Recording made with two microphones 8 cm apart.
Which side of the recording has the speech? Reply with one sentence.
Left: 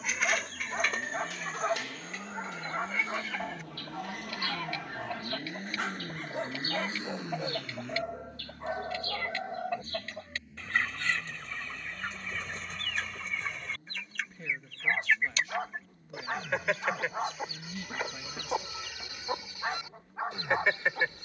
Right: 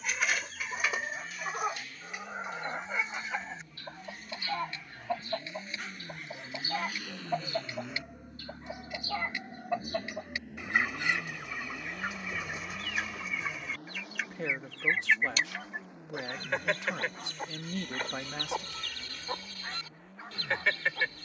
In this clip you hear the speech on the right.